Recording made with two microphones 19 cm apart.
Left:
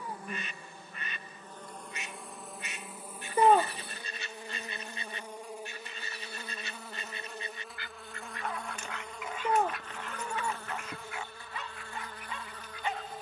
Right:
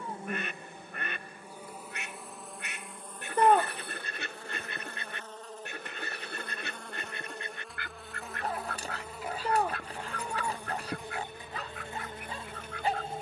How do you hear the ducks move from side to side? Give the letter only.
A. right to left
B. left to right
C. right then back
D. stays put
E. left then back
D.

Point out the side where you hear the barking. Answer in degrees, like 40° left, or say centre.
40° right.